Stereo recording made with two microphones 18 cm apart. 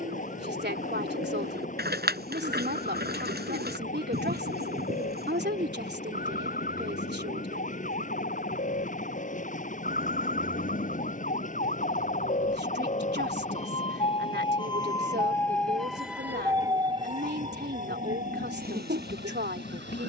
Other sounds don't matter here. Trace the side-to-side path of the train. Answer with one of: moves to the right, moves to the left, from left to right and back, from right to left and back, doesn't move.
doesn't move.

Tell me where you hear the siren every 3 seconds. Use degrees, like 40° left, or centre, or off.
70° left, 60° left, 60° left, 60° left, 40° left, 20° right, 70° right.